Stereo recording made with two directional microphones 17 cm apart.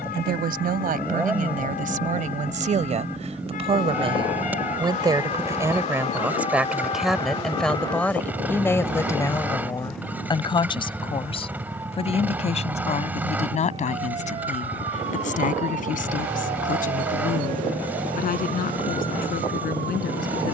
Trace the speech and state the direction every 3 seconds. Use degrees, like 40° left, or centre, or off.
50° right, 30° right, centre, 30° left, 40° left, 50° left, 60° left.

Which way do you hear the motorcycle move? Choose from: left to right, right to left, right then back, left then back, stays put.
stays put.